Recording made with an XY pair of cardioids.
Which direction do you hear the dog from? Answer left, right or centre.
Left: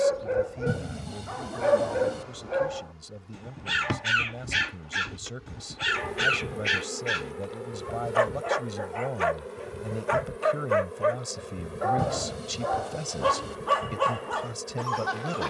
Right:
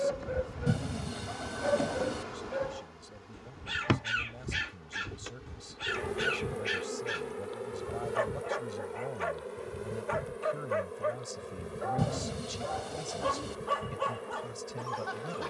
left.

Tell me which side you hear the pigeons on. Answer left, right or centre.
centre.